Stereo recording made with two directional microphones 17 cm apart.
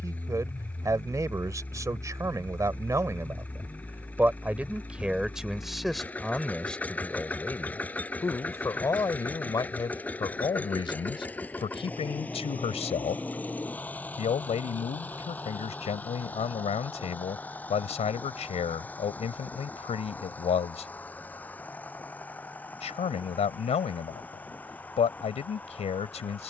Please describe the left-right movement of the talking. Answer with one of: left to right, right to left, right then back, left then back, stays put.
right to left.